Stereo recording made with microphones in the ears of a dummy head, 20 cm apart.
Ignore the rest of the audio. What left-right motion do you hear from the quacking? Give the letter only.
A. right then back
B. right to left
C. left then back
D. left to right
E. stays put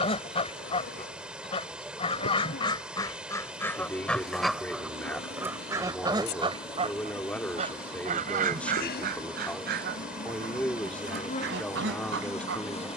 D.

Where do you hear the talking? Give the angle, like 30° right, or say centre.
10° left.